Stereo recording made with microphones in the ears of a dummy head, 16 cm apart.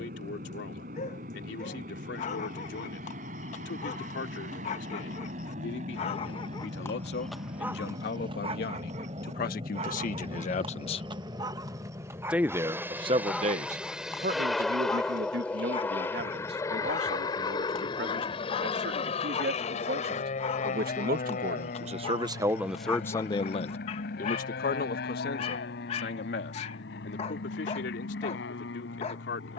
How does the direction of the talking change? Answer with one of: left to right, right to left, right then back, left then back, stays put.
right then back.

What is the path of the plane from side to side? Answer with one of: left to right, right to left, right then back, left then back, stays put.
right to left.